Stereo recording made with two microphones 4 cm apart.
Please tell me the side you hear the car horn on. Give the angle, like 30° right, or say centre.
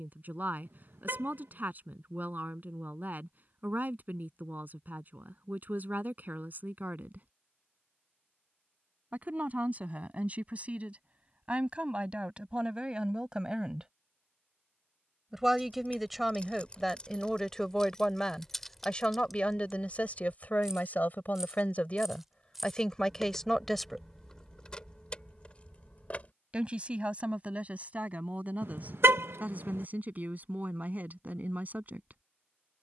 70° right.